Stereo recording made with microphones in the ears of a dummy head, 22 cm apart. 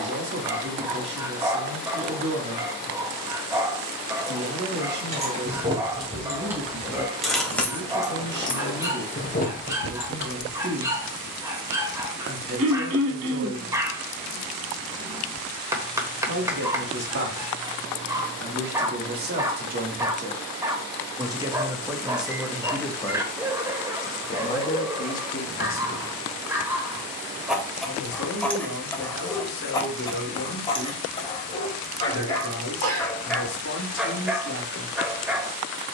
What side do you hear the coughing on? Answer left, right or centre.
right.